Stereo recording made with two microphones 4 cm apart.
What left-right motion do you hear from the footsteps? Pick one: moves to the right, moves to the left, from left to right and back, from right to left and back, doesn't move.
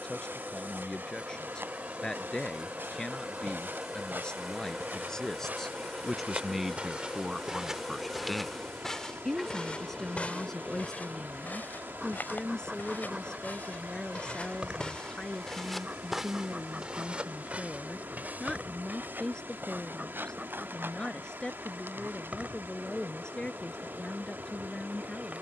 from right to left and back.